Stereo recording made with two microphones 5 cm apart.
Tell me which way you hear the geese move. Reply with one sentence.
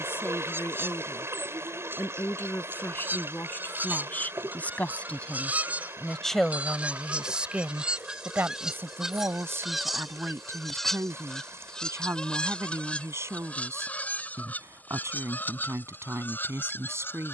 You can hear the geese travel towards the left.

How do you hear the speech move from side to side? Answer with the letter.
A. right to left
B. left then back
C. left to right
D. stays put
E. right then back
C.